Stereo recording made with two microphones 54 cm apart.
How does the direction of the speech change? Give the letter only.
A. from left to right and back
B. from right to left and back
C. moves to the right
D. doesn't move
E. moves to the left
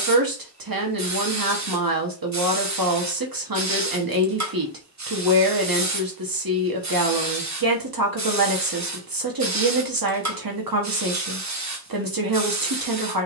D.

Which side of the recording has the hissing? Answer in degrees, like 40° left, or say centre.
30° right.